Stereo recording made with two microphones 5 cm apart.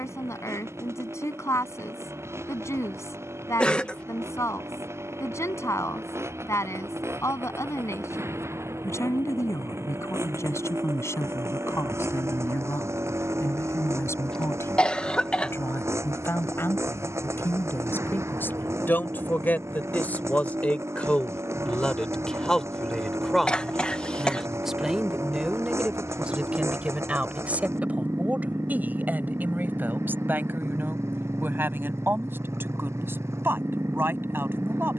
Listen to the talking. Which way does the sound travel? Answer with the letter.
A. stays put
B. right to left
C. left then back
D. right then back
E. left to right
E.